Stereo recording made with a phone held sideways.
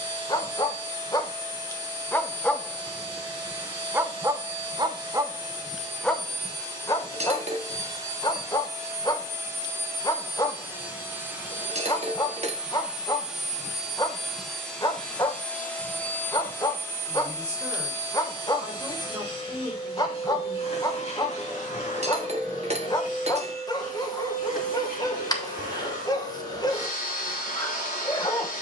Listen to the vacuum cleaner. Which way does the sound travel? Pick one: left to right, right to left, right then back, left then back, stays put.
right to left.